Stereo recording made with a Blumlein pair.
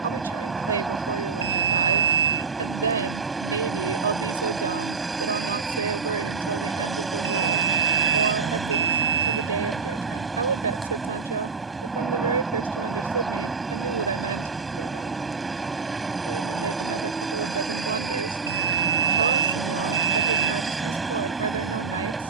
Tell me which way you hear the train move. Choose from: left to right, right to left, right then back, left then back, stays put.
stays put.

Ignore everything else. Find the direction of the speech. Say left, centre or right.
right.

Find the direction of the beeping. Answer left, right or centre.
right.